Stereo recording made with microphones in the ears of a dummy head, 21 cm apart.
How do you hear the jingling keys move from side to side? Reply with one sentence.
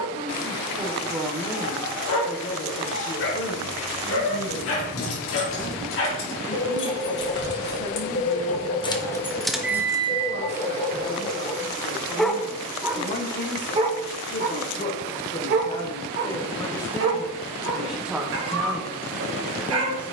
You can hear the jingling keys move from left to right.